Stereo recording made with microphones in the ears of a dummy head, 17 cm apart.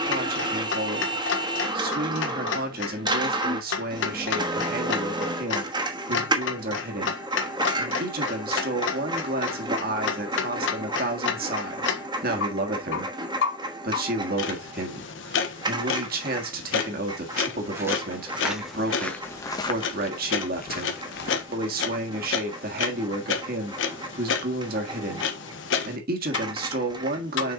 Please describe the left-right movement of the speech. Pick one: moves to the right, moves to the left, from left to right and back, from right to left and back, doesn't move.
doesn't move.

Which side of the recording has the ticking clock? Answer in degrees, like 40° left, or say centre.
70° left.